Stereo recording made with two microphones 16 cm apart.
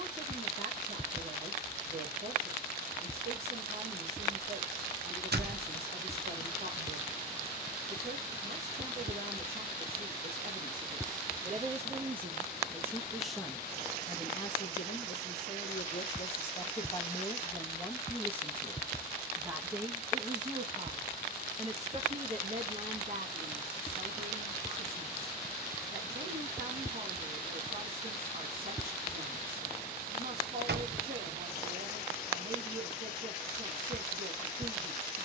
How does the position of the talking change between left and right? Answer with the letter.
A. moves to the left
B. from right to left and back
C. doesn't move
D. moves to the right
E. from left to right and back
B.